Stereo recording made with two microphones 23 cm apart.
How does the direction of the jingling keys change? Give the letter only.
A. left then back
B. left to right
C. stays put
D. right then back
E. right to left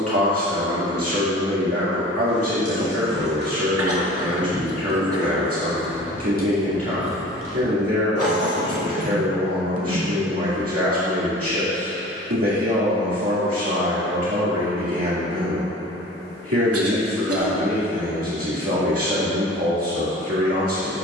E.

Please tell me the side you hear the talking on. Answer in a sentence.
In this clip you hear the talking on the right.